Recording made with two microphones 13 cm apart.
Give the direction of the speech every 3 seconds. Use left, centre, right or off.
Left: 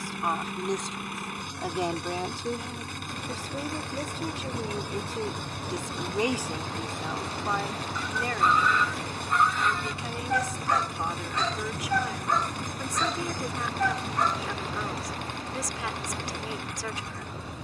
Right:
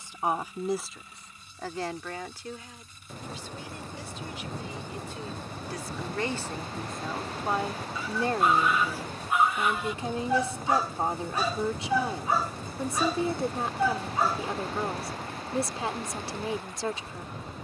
centre, left, centre, right, right, right.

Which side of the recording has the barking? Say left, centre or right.
centre.